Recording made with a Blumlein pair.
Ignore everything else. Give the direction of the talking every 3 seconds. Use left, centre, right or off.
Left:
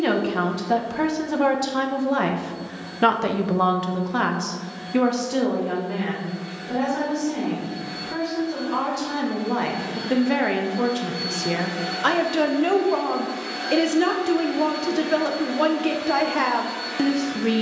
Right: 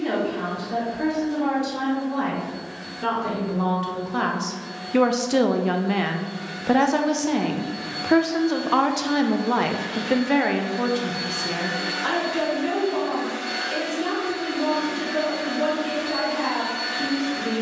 left, centre, right, centre, left, left.